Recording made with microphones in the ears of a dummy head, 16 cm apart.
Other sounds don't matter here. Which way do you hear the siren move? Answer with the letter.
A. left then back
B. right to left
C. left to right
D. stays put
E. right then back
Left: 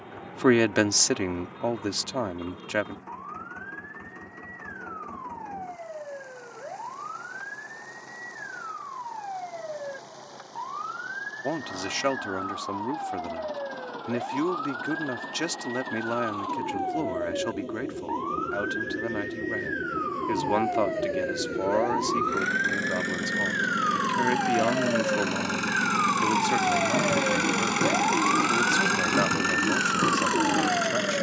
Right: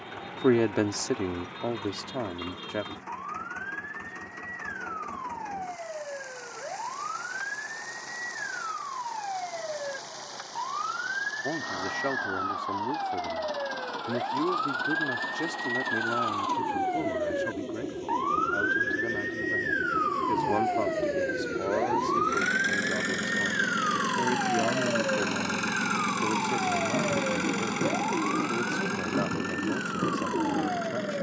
B.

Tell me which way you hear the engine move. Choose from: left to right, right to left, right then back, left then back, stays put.
right to left.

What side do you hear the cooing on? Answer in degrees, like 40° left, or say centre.
80° left.